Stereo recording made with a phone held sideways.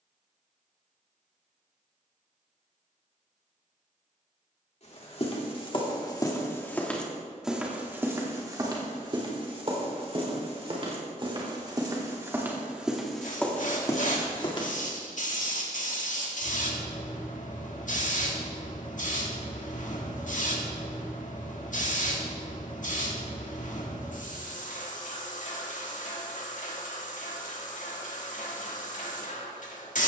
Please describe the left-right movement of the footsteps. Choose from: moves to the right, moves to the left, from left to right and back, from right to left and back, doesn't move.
from left to right and back.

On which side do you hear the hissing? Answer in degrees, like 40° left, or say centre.
70° left.